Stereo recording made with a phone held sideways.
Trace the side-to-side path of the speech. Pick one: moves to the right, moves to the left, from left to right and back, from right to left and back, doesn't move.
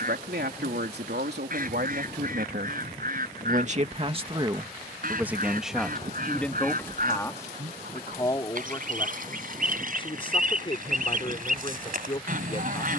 moves to the left.